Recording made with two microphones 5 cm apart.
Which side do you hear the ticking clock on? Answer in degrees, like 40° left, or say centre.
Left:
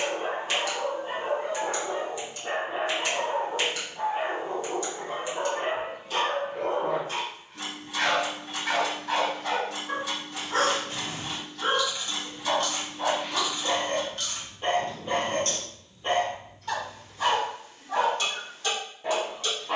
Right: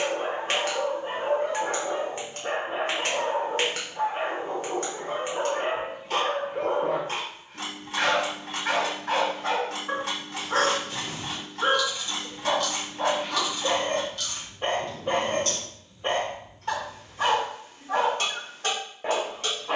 50° right.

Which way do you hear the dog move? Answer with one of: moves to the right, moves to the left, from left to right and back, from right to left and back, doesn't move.
doesn't move.